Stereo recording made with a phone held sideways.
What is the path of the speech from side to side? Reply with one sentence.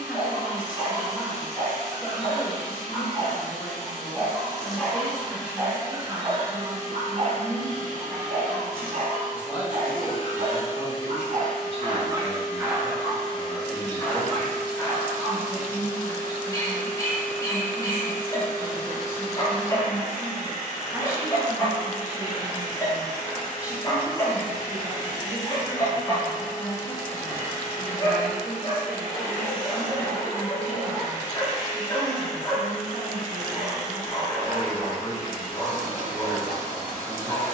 You can hear the speech stay in one place.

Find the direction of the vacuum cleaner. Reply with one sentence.
You can hear the vacuum cleaner on the left.